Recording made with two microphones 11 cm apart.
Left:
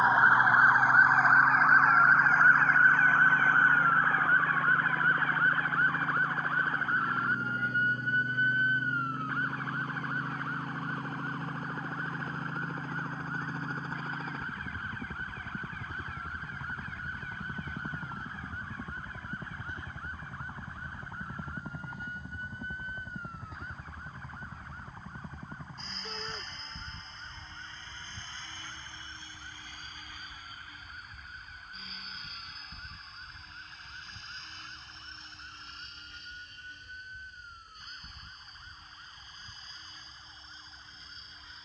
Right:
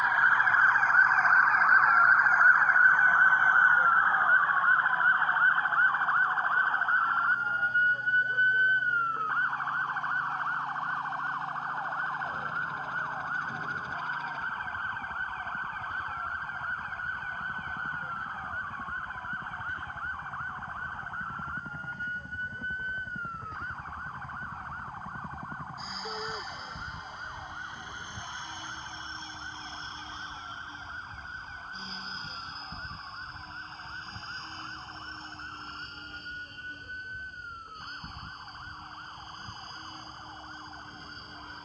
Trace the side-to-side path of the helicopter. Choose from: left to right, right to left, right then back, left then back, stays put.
left to right.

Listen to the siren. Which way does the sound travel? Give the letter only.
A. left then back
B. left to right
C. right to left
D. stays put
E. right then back
B.